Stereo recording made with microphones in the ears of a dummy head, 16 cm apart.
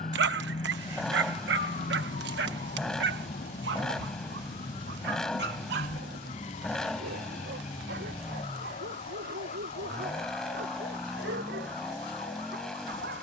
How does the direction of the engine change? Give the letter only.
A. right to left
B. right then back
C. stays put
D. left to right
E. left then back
C.